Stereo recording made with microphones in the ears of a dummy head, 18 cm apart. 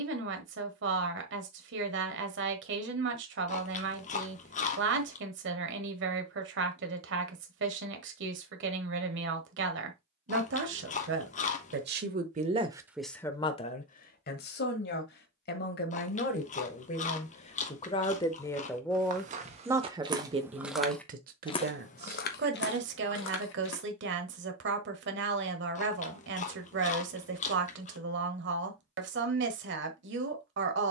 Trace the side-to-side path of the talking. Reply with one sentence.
In this clip you hear the talking go left and come back.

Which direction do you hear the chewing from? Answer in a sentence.
You can hear the chewing on the left.